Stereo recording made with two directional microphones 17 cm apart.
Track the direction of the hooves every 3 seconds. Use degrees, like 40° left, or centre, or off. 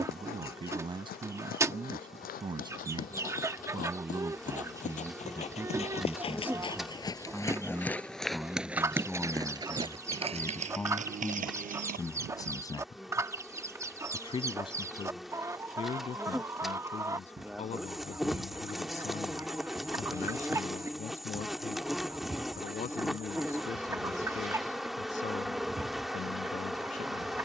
60° left, 50° left, 10° left, 40° right, 60° right, off, off, off, off.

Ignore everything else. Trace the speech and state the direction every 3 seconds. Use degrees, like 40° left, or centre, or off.
30° right, 20° right, centre, 10° left, 20° left, 40° left, 40° left, 50° left, 50° left.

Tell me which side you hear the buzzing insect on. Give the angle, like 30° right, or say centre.
centre.